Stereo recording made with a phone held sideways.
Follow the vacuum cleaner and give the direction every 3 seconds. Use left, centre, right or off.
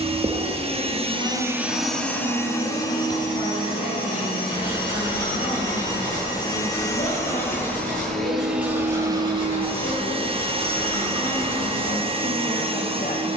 centre, left, centre, right, right.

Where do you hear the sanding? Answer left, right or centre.
left.